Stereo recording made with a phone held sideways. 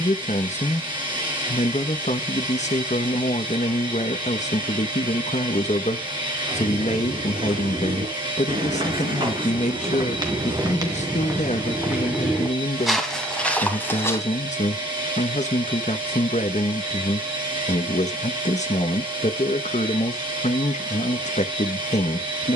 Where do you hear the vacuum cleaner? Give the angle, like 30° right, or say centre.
30° right.